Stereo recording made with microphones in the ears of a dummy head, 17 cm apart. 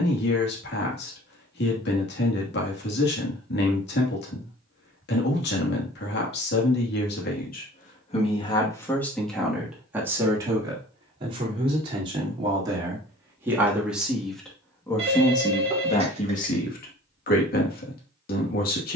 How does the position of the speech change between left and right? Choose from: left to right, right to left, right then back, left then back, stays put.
right then back.